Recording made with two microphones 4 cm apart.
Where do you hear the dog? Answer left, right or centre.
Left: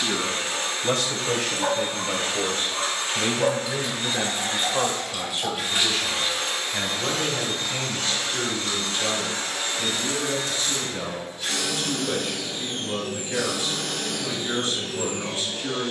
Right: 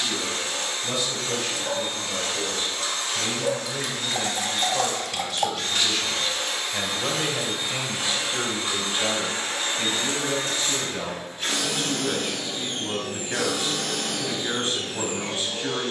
left.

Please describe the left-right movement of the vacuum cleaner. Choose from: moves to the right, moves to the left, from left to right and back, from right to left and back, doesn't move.
moves to the right.